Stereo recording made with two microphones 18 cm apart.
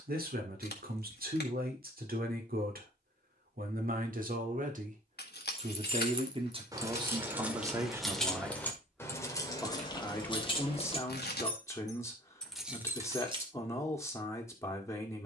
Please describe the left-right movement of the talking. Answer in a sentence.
You can hear the talking go from the right side to the left.